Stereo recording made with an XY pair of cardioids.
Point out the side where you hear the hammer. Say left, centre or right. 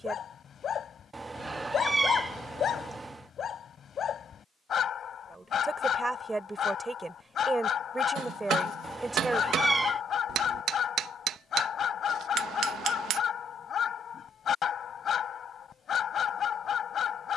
right.